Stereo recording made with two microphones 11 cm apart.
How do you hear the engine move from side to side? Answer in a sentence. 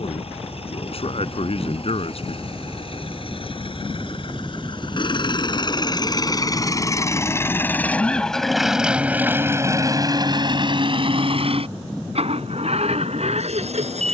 In this clip you hear the engine travel towards the right.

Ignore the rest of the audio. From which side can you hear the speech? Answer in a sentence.
You can hear the speech on the left.